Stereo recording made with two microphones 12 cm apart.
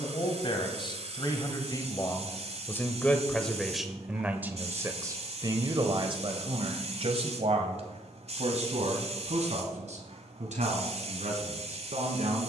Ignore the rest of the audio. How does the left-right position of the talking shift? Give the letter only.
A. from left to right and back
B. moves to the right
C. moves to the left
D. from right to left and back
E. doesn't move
B.